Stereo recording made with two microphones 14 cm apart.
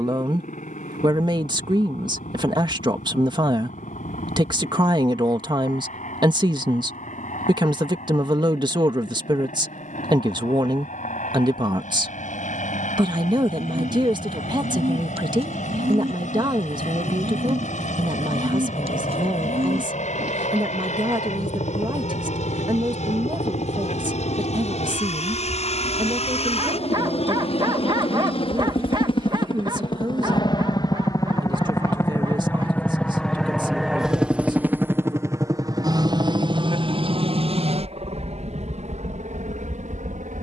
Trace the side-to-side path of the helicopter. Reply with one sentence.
In this clip you hear the helicopter move from left to right.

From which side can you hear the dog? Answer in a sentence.
You can hear the dog on the right.